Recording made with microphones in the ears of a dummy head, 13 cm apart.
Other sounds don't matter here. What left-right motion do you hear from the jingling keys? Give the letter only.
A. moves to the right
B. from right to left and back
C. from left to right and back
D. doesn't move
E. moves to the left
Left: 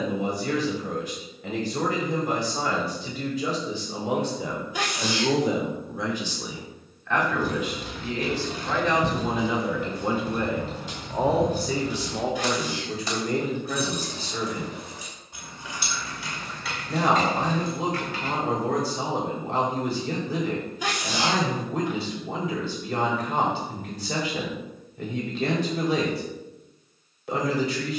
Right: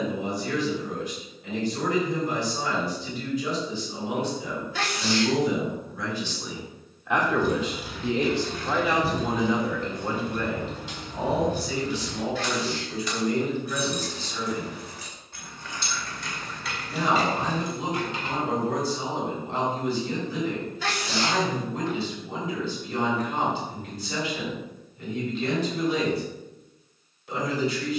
B.